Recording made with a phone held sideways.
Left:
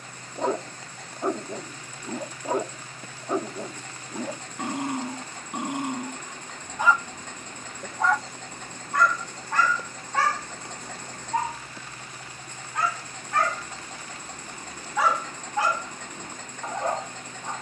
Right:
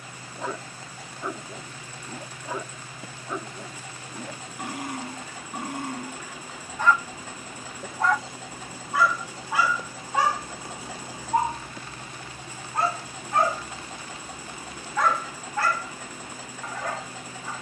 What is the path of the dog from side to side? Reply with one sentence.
In this clip you hear the dog go right and come back.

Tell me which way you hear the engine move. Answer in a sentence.
You can hear the engine stay put.